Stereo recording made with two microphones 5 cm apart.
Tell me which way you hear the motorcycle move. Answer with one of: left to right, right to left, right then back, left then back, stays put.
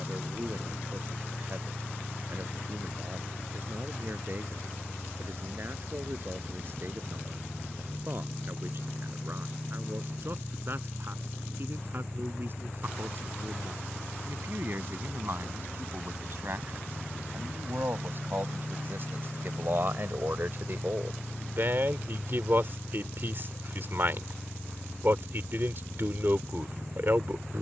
stays put.